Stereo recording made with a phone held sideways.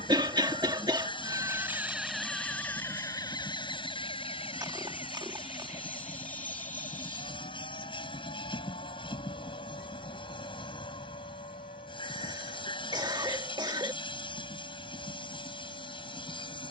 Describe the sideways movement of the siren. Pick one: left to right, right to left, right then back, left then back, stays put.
right to left.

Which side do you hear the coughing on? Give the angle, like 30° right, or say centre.
30° right.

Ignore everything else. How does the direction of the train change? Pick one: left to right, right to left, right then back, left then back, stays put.
stays put.